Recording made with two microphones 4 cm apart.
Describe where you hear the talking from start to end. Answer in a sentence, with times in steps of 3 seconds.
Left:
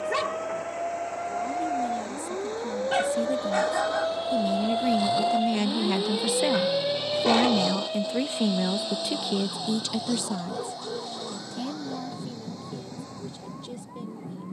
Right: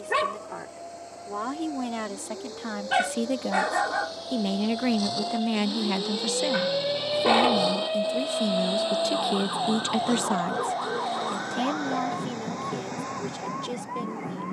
In this clip you hear the talking on the right from 0 s, on the left from 6 s and on the right from 9 s.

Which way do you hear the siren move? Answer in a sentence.
In this clip you hear the siren move from left to right.